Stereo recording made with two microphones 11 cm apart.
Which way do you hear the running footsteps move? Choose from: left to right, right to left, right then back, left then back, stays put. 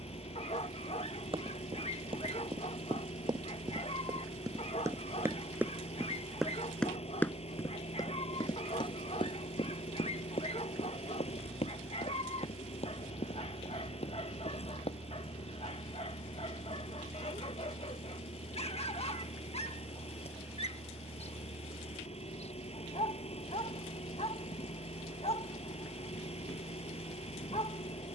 right to left.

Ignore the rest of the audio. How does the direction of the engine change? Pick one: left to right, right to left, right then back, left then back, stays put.
stays put.